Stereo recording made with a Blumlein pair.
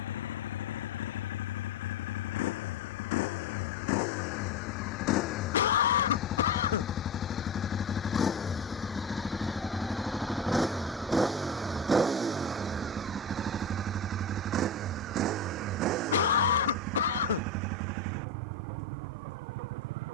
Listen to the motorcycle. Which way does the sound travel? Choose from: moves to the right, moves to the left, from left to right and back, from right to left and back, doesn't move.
moves to the right.